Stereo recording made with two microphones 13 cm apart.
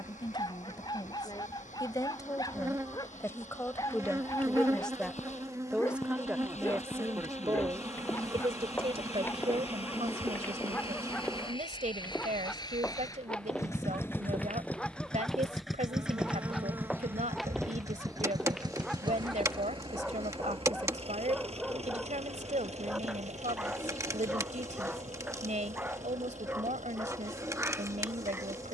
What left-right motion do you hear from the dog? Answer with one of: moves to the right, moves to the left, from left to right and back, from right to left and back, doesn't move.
moves to the right.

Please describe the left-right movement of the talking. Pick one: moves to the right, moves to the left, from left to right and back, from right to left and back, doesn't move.
moves to the right.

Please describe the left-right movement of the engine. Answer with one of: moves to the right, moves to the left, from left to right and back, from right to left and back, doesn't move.
moves to the right.